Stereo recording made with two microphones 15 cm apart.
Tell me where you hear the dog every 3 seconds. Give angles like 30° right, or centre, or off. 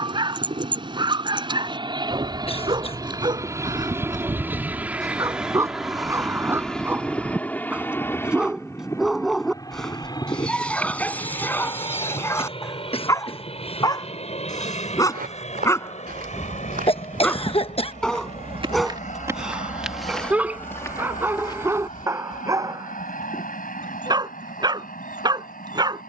30° right, 20° right, 10° right, 10° left, 20° left, 20° left, centre, 20° right, 30° right.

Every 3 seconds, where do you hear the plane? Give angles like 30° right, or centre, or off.
30° right, 10° right, 10° left, 30° left, 40° left, 50° left, 50° left, 60° left, 60° left.